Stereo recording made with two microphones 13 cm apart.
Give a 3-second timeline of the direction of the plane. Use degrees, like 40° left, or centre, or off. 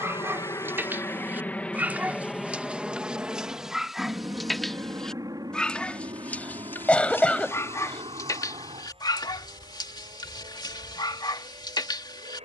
10° left, 20° right, 40° right, 40° right.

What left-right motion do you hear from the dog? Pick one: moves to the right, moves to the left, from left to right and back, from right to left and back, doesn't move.
moves to the left.